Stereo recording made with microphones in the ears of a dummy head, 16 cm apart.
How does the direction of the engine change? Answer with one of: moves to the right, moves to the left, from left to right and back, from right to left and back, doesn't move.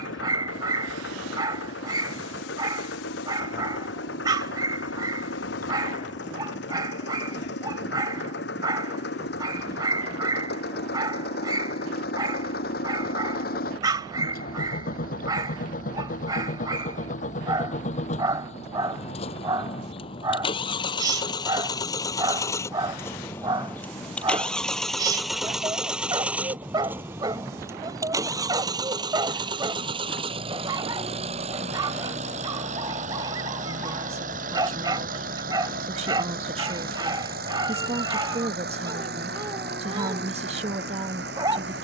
moves to the right.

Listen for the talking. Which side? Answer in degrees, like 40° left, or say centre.
40° right.